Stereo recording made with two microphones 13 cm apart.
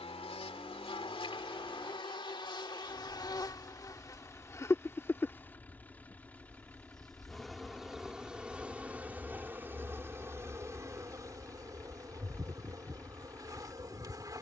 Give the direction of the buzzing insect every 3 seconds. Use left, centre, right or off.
left, left, centre, right, right.